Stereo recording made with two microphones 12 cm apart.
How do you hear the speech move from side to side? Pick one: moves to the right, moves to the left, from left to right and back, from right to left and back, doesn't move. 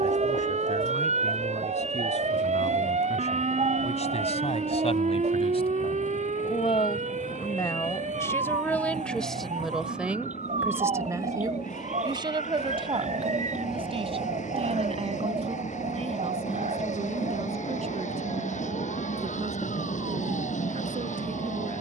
moves to the right.